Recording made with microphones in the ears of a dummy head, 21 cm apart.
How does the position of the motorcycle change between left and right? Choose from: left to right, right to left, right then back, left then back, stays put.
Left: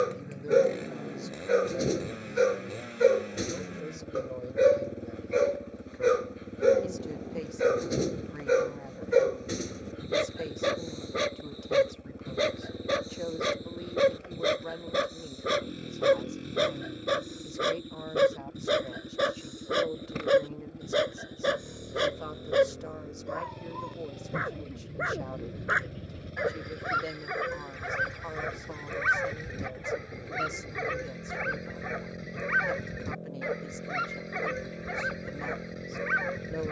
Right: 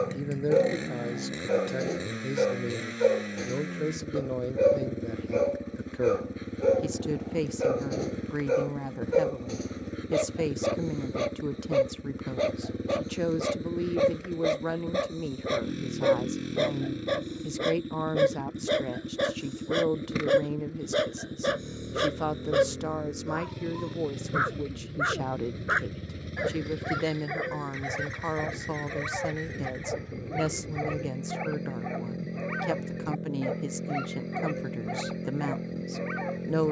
stays put.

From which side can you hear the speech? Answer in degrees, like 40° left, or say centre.
80° right.